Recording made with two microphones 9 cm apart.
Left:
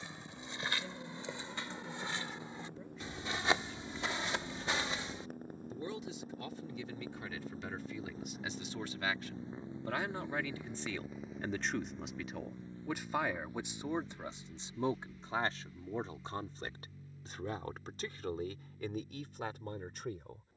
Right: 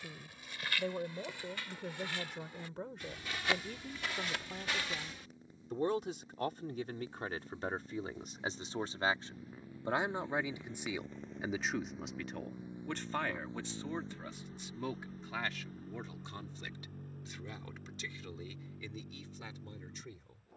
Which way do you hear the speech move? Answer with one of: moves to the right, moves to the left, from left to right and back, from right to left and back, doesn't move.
moves to the left.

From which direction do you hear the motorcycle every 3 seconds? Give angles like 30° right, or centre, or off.
70° left, 60° left, 40° left, 10° left, 20° right, 50° right, 60° right.